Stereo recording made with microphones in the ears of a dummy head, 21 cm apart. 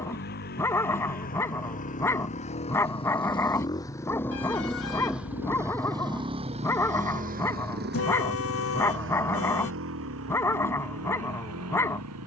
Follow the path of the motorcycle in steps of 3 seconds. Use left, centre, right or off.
left, centre, right, right.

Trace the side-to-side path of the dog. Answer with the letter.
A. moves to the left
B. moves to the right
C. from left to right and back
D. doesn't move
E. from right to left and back
D.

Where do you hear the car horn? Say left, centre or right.
left.